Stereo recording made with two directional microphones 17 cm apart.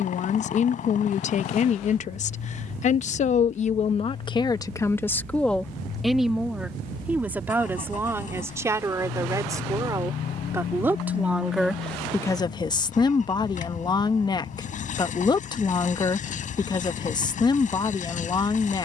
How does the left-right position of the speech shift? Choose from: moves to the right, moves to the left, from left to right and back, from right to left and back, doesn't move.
from left to right and back.